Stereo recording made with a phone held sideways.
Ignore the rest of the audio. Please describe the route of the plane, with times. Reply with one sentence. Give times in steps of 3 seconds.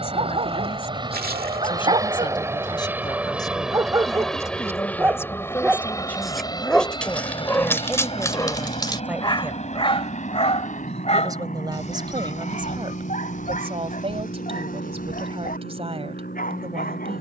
In this clip you hear the plane on the right from 0 s, in the centre from 3 s and on the left from 6 s.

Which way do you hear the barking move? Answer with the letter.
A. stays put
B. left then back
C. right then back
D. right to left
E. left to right
D.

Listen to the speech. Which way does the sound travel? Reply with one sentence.
In this clip you hear the speech move to the right.